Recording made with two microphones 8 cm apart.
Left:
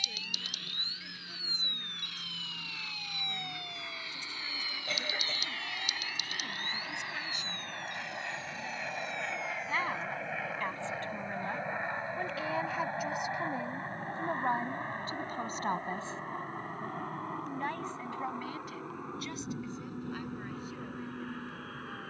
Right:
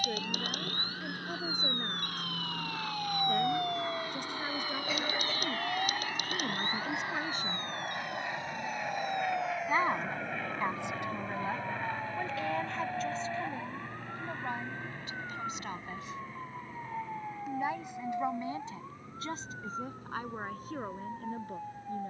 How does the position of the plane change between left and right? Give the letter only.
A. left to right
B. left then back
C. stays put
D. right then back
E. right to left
E.